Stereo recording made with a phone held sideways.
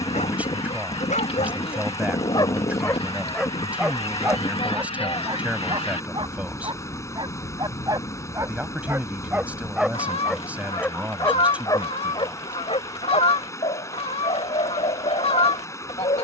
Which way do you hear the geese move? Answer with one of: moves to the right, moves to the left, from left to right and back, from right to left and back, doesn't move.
doesn't move.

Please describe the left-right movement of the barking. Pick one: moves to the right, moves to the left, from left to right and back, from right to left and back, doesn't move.
from left to right and back.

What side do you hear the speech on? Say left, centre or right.
centre.